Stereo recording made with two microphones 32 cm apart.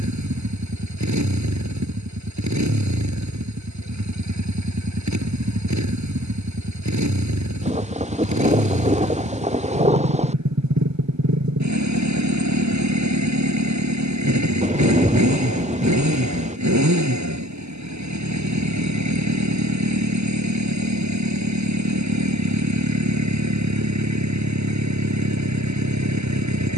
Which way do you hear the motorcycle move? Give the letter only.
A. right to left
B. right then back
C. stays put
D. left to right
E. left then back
C.